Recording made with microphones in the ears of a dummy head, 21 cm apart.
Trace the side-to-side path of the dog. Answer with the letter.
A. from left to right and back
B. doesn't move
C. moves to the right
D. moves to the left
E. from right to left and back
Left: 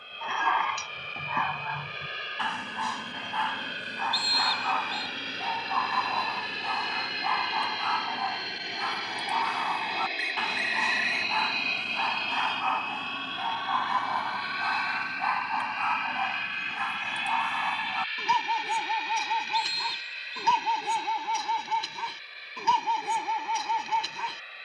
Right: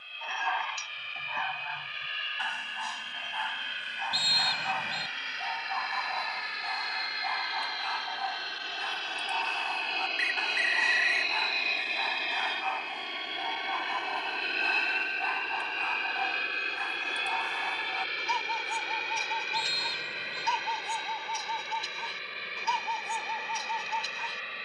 B.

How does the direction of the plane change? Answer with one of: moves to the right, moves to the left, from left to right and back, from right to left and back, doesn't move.
moves to the right.